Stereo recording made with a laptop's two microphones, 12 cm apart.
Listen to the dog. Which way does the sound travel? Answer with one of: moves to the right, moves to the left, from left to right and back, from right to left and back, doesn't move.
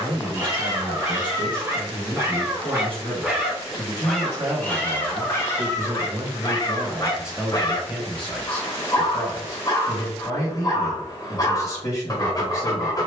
moves to the left.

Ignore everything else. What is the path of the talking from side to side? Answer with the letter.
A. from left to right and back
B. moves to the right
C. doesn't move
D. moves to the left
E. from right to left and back
D.